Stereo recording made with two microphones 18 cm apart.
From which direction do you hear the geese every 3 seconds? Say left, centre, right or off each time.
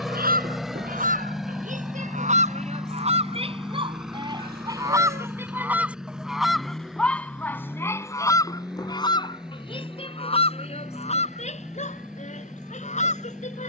right, right, centre, left, left.